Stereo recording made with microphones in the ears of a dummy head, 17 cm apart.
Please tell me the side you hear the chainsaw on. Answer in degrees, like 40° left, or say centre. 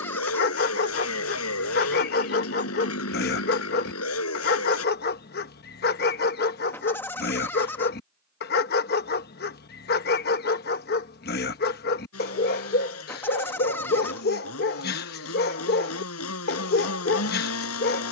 80° left.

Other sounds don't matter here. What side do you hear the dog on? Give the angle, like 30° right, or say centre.
50° left.